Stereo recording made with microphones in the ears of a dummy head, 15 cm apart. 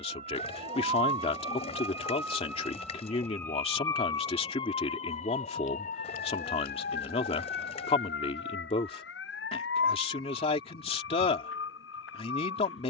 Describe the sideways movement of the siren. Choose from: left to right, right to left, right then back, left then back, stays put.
right to left.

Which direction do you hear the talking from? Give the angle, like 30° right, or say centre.
40° left.